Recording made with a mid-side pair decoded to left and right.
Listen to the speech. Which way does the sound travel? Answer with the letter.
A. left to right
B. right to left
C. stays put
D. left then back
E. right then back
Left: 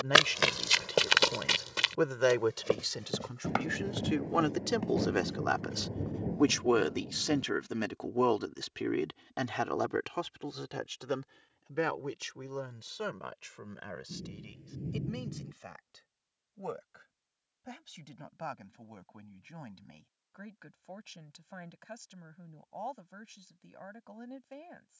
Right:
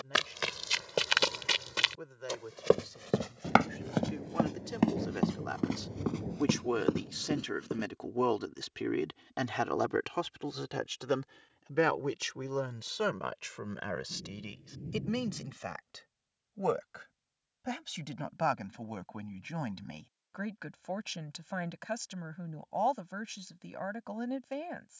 A.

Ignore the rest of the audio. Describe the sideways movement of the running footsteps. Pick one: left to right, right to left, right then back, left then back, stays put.
left to right.